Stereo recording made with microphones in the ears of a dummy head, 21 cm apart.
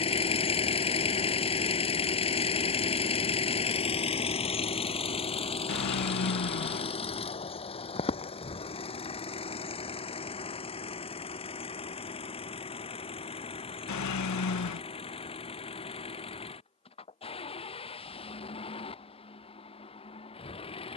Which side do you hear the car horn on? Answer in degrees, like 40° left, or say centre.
90° left.